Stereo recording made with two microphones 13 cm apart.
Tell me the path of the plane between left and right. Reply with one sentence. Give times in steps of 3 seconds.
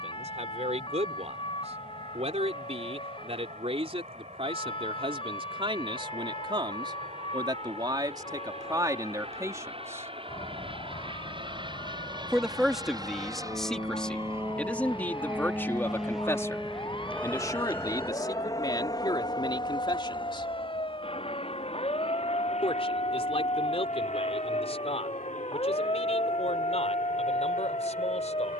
In this clip you hear the plane on the right from 0 s, in the centre from 15 s and on the left from 18 s.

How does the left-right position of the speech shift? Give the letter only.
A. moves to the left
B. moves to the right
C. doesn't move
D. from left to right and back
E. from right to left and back
A.